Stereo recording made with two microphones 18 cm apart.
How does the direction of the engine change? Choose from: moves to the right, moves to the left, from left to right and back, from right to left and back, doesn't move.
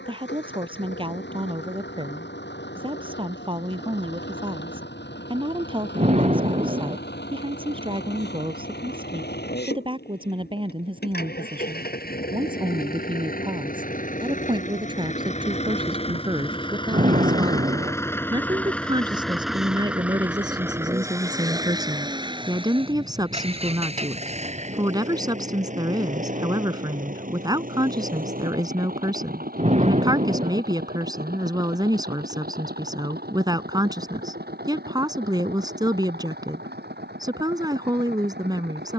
moves to the right.